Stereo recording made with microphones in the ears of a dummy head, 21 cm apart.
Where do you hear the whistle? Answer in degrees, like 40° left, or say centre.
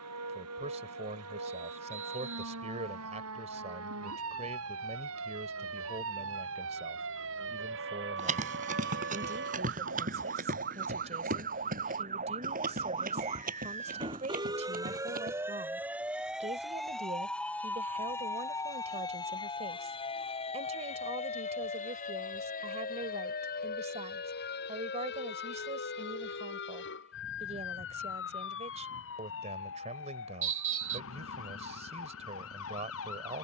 30° right.